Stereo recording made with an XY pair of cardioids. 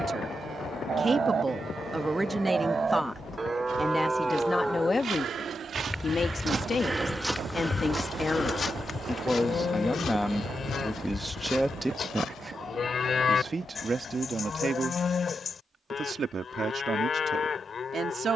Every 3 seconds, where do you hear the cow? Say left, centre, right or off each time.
right, centre, left, left, left, left.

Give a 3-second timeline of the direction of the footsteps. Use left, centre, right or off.
off, right, centre, left, left, off.